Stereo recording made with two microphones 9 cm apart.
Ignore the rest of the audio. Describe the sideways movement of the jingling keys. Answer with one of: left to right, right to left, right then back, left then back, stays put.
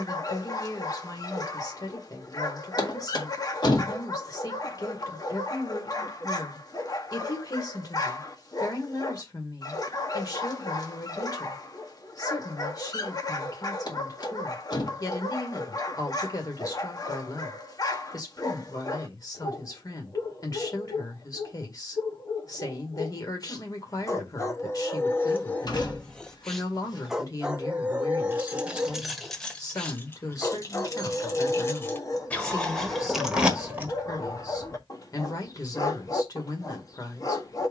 left then back.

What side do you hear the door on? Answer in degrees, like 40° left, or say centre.
50° left.